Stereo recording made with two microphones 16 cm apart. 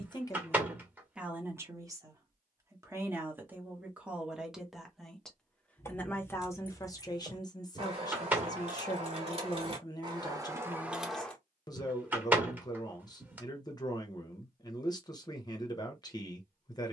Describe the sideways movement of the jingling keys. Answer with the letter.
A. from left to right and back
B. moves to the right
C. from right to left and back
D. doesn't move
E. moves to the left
A.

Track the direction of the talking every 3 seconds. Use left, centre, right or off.
centre, centre, left, left, left, left.